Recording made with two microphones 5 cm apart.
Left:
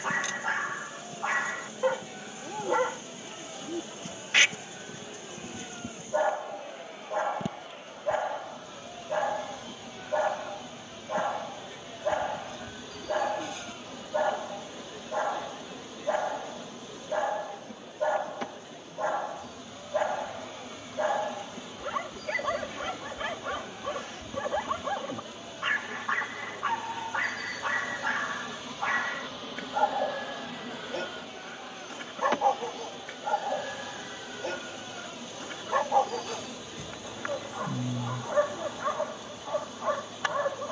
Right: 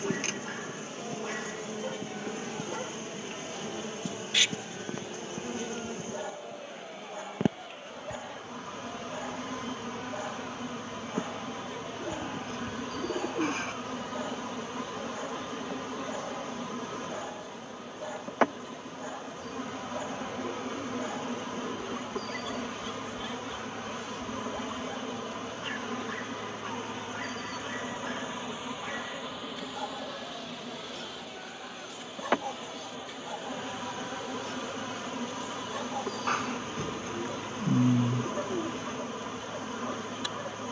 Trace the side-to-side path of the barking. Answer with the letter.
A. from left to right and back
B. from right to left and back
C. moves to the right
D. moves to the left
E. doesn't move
E.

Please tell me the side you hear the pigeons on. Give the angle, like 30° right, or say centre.
50° right.